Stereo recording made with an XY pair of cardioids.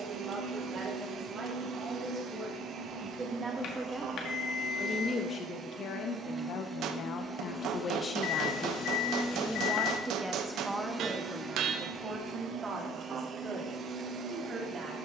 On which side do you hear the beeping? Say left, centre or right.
left.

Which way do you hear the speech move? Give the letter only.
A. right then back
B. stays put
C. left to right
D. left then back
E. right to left
D.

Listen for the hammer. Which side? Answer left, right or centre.
right.